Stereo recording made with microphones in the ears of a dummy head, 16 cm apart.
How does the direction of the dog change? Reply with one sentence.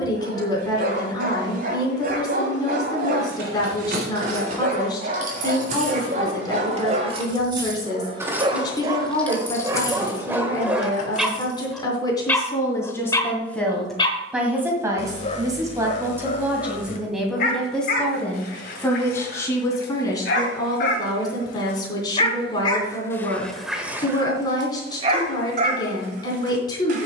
In this clip you hear the dog go left and come back.